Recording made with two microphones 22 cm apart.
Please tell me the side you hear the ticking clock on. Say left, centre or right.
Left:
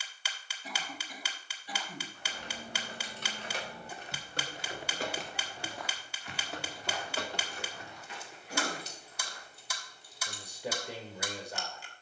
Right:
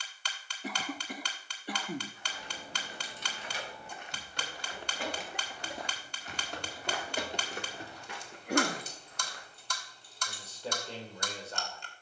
centre.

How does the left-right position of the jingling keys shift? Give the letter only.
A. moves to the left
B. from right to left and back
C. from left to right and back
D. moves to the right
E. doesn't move
D.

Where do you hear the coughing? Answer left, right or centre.
right.